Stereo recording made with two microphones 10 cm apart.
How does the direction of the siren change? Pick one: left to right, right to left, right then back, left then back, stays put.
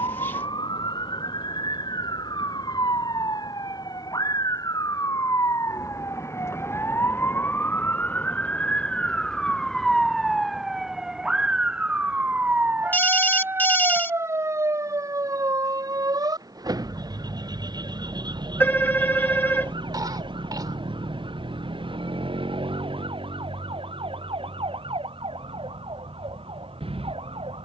left to right.